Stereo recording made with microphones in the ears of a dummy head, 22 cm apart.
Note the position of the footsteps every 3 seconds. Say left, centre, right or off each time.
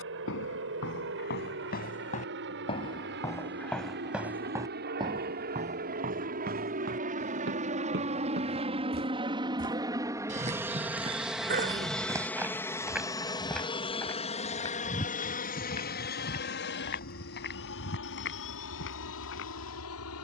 left, centre, right, right, centre, left, left.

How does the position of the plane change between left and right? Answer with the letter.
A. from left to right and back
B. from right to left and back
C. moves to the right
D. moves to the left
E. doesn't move
D.